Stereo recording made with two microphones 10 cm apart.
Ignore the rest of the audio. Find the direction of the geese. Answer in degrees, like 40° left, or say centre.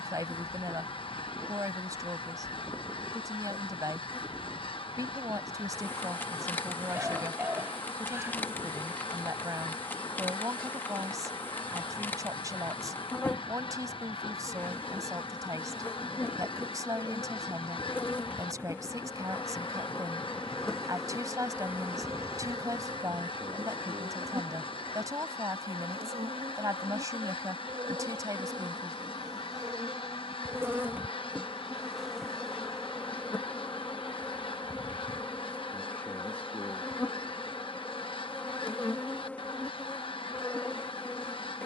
60° left.